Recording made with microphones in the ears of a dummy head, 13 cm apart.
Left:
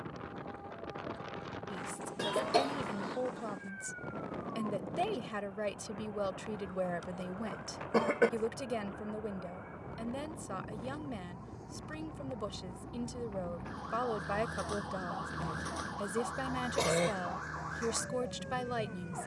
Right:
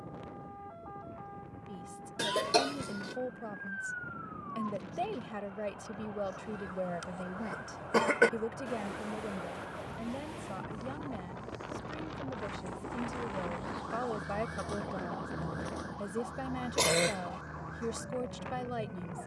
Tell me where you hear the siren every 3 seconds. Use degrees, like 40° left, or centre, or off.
60° right, 50° right, 50° right, 30° right, centre, 40° left, 70° left.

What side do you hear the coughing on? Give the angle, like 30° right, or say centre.
40° right.